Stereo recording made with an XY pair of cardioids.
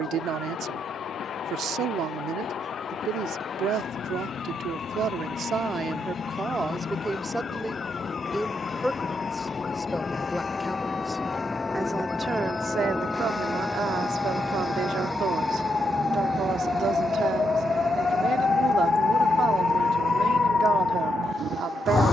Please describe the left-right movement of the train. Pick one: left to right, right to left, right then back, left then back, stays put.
left to right.